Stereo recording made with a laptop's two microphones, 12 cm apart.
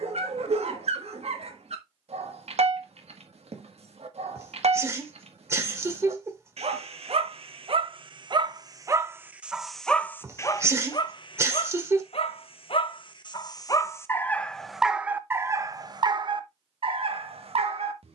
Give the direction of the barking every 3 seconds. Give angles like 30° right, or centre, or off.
60° right, 60° right, 50° right, 30° left, 30° left, 40° right.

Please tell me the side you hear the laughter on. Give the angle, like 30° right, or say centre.
20° right.